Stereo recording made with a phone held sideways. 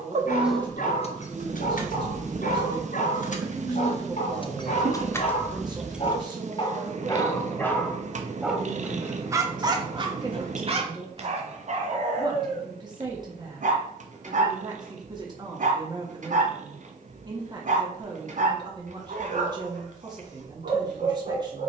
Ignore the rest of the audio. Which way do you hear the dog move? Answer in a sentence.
You can hear the dog go from the left side to the right.